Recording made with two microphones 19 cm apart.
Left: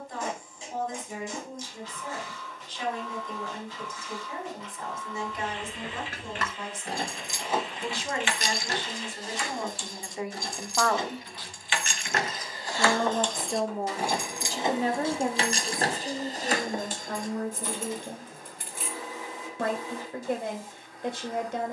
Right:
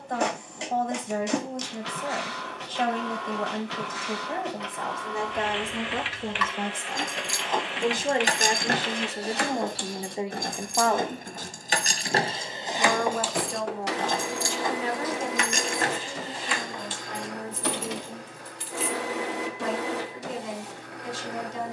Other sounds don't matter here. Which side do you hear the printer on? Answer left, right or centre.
right.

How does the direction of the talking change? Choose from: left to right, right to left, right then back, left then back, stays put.
right to left.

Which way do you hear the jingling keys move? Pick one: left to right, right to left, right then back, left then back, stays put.
right then back.